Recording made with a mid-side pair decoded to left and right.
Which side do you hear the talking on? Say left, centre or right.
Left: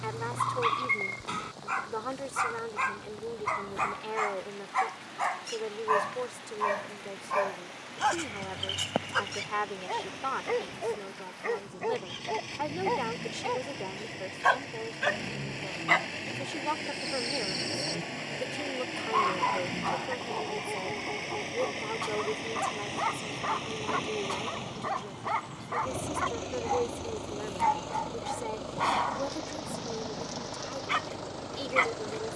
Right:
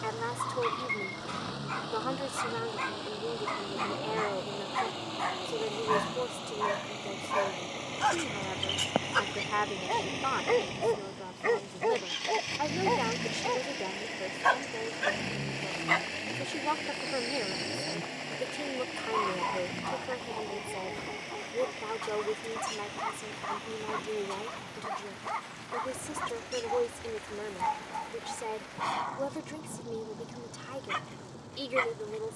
centre.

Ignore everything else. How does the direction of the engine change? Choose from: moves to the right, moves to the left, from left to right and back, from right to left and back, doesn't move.
moves to the left.